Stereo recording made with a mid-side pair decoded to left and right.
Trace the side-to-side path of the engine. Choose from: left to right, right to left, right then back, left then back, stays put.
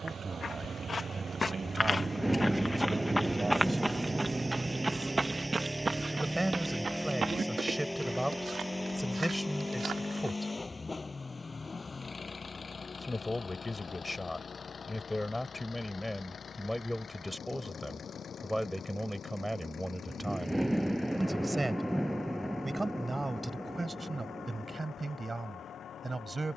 right to left.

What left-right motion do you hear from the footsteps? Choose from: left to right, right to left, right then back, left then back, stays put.
left to right.